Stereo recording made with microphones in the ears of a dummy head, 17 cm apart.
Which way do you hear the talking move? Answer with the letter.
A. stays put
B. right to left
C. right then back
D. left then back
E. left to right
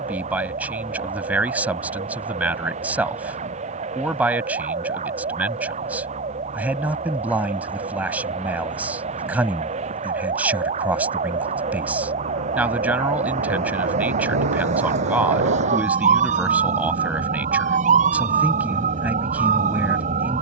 A.